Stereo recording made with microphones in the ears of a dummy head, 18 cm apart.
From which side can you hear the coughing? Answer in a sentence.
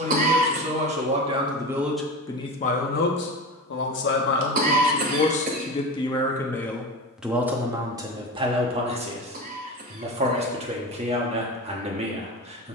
In this clip you hear the coughing on the right.